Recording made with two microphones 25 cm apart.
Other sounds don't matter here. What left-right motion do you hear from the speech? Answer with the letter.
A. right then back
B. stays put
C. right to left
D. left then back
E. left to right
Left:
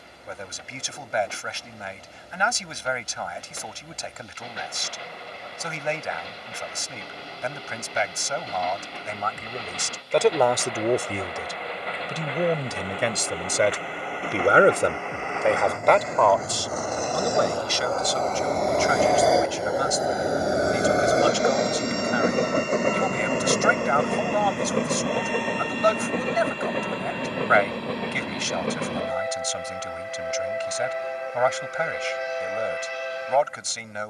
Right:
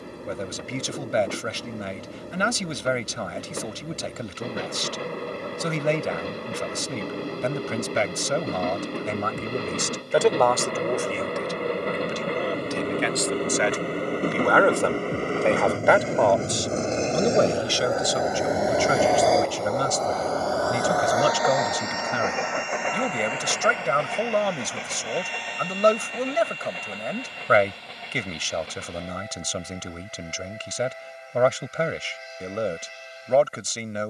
D.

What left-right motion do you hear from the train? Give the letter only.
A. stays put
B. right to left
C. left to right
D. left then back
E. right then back
B.